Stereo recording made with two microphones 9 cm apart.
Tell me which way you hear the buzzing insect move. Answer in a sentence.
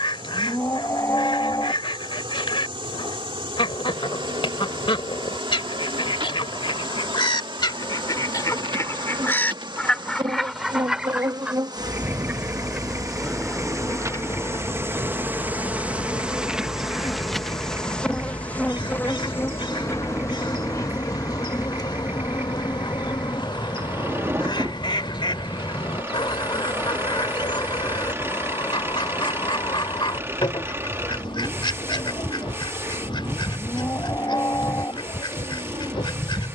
You can hear the buzzing insect move to the left.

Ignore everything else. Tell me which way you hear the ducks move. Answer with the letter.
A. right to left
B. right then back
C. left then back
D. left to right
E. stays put
B.